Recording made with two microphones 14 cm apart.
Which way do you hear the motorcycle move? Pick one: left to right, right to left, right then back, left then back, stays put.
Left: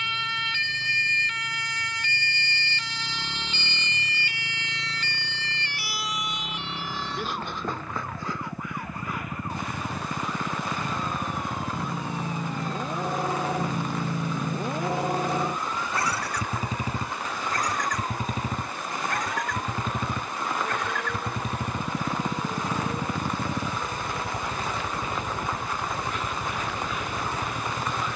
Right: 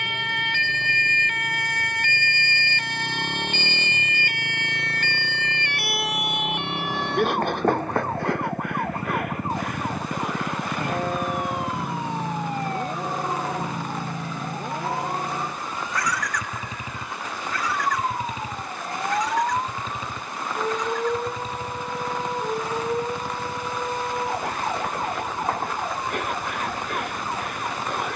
right to left.